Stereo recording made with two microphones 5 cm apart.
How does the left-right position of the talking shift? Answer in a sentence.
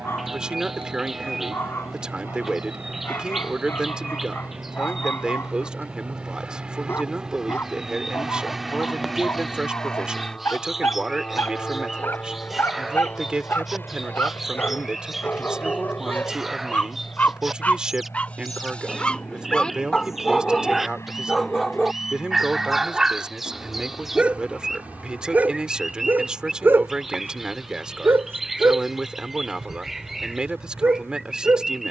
In this clip you hear the talking stay in one place.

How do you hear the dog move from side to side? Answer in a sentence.
In this clip you hear the dog travel towards the right.